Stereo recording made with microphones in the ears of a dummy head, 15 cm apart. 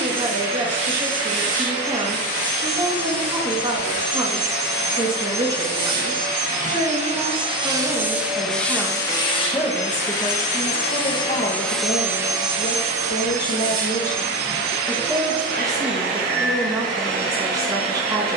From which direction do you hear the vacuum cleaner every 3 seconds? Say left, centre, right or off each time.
right, right, right, left, right, right.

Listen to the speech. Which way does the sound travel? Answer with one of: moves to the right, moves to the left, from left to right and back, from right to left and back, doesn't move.
from right to left and back.